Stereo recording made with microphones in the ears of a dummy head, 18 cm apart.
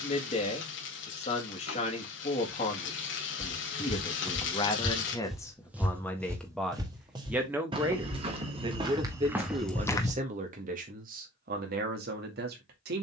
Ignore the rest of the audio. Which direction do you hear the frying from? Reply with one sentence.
In this clip you hear the frying on the left.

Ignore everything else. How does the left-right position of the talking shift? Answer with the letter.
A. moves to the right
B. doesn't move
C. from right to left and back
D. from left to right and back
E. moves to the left
A.